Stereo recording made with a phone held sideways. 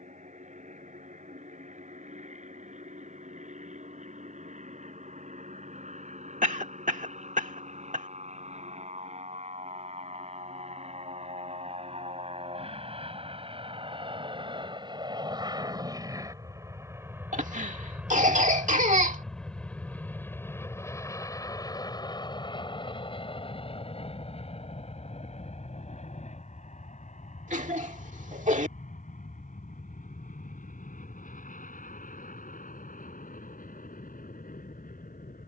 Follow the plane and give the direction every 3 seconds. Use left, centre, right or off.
right, right, right, right, right, right, centre, left, left, left, left, left.